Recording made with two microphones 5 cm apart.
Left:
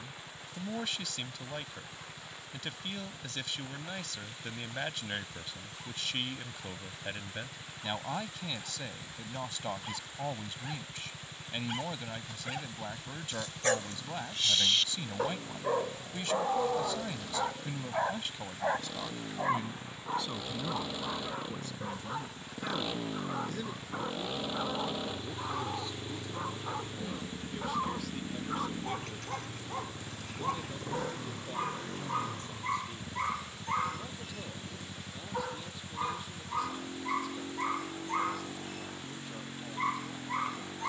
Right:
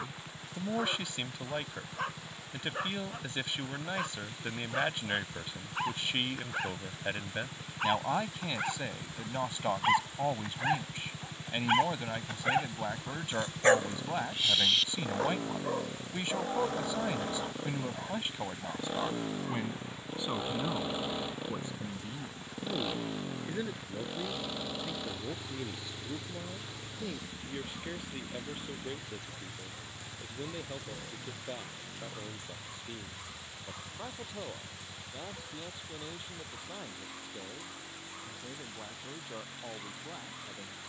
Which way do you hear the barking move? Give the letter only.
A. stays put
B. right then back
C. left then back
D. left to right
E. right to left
E.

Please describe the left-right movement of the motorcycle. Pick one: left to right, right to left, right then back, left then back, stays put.
right to left.